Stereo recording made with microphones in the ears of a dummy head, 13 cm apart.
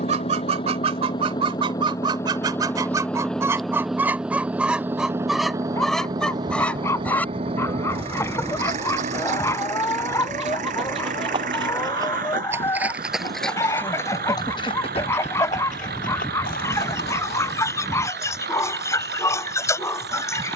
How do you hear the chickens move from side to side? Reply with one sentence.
In this clip you hear the chickens travel towards the left.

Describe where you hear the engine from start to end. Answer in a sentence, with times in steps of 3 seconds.
In this clip you hear the engine on the left from 0 s, in the centre from 3 s and on the right from 6 s.